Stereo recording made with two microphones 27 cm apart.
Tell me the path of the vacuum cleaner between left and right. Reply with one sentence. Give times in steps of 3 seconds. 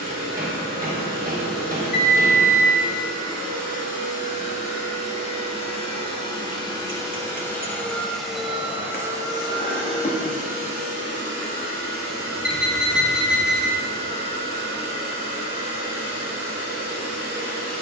In this clip you hear the vacuum cleaner on the left from 0 s, in the centre from 6 s and on the right from 9 s.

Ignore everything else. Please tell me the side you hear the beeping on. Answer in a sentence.
You can hear the beeping on the left.